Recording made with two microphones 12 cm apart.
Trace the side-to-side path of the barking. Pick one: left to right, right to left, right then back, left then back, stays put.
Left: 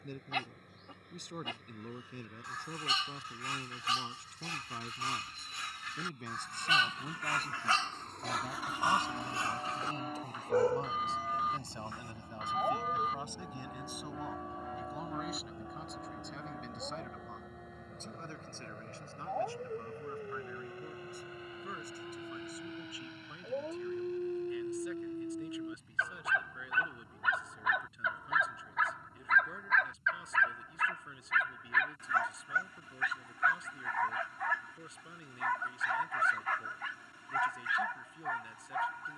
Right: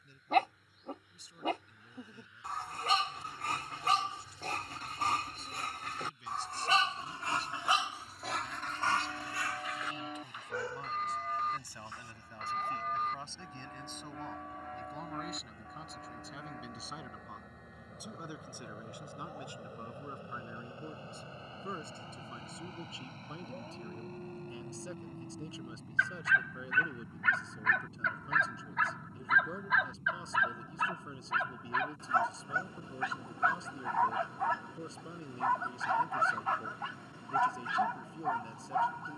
left then back.